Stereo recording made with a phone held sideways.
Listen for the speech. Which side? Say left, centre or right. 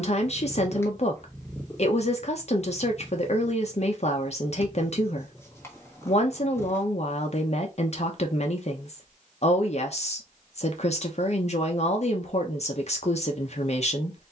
left.